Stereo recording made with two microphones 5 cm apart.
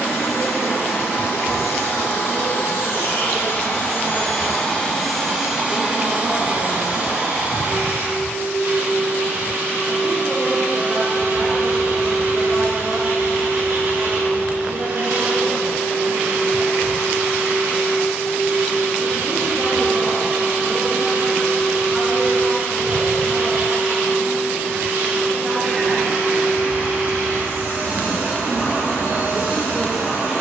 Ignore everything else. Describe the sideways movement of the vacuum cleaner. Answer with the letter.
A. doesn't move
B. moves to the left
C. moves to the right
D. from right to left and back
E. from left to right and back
C.